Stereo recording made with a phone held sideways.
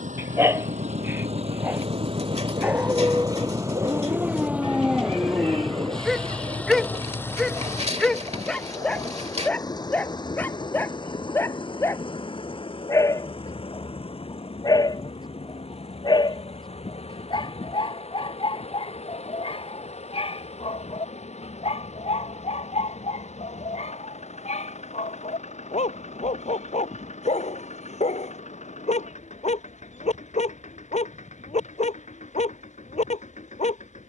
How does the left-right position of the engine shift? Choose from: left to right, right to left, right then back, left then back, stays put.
right to left.